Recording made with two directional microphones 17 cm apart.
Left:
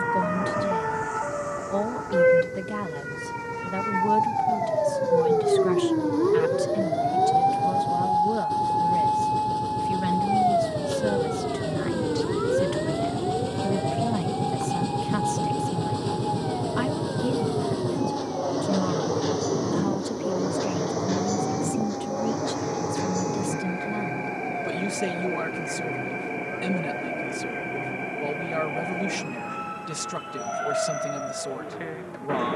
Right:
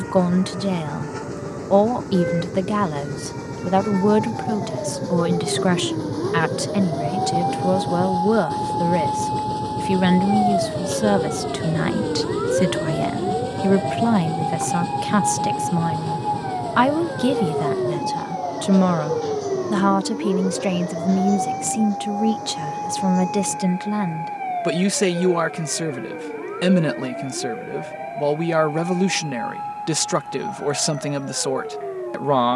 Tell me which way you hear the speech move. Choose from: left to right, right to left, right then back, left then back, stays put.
stays put.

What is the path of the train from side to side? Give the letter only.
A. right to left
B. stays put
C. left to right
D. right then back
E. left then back
A.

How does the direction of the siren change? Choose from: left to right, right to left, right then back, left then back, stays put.
left to right.